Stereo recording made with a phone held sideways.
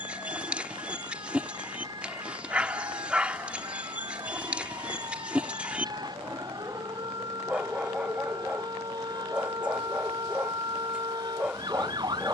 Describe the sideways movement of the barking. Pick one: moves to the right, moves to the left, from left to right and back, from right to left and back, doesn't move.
doesn't move.